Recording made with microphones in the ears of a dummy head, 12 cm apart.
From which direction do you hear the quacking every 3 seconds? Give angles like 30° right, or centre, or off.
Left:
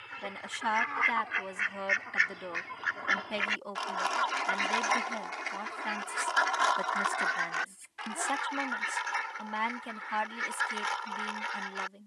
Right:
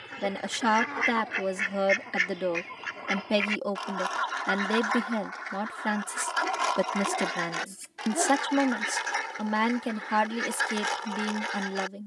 40° right, 10° left, 30° right, 50° right.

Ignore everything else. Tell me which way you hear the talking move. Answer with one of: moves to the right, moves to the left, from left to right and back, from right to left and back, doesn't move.
doesn't move.